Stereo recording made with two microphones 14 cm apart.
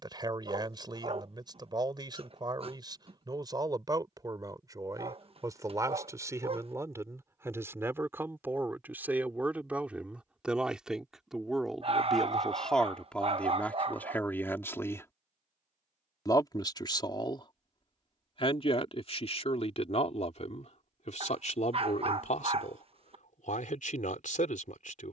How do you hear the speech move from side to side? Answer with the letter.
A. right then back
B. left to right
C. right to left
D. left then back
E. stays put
C.